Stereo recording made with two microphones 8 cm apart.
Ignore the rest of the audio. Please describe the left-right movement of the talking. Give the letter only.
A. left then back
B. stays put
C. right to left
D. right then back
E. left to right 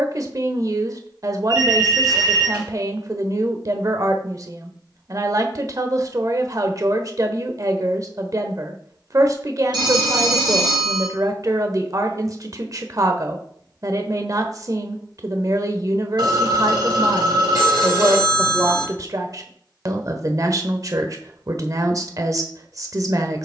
B.